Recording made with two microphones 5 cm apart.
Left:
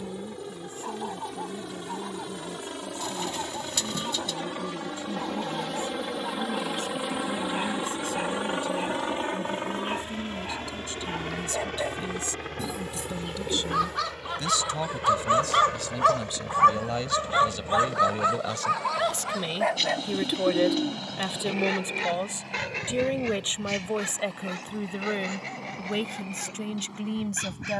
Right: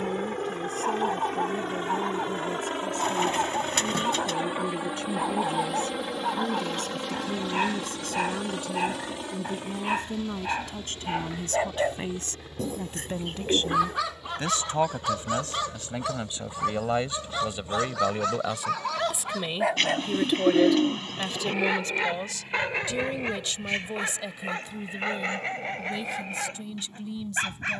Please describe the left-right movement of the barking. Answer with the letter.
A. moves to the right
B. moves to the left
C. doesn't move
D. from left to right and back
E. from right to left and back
E.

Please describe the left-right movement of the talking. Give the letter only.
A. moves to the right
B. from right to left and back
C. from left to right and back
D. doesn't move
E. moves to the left
E.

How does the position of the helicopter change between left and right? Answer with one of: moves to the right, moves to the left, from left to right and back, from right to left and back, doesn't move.
moves to the left.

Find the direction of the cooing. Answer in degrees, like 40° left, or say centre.
40° right.